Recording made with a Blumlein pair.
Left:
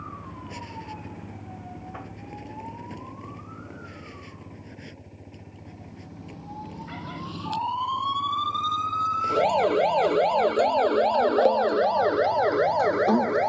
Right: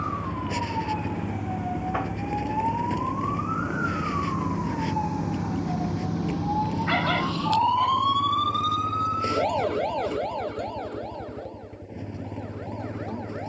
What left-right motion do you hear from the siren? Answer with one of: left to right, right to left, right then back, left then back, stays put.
right to left.